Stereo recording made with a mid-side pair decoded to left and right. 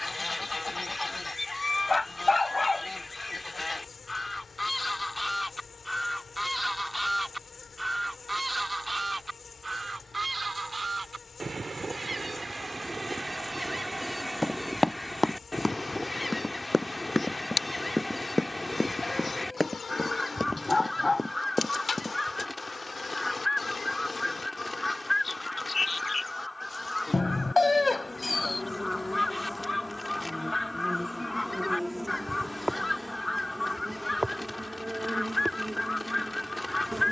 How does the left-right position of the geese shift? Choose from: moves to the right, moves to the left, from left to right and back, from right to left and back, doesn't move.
from left to right and back.